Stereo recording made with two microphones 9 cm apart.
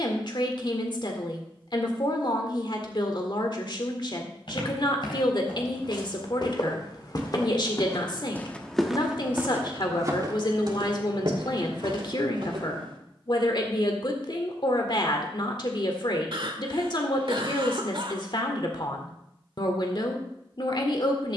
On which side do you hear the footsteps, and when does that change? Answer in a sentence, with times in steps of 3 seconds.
In this clip you hear the footsteps not at all from 0 s, on the left from 3 s, on the right from 9 s and not at all from 15 s.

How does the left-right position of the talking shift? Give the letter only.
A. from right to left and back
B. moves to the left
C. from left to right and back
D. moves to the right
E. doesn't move
E.